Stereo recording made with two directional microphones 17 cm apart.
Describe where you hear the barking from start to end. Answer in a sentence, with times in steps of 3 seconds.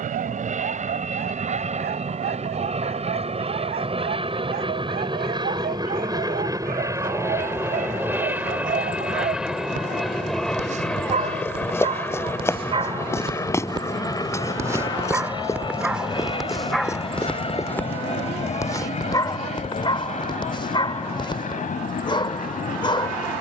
You can hear the barking on the right from 0 s, in the centre from 15 s and on the left from 18 s.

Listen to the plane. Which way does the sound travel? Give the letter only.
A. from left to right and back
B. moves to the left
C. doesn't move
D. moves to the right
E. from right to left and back
B.